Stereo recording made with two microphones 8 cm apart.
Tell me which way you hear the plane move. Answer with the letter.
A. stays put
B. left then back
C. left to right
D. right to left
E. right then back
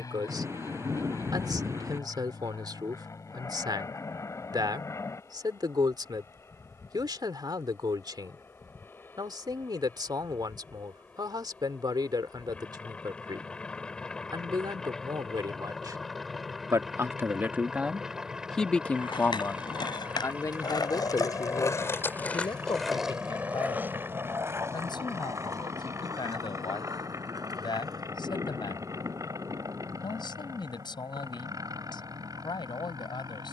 C.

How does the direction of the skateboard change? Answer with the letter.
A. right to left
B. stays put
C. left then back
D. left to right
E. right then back
D.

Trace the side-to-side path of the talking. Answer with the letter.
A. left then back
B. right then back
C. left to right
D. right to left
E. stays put
D.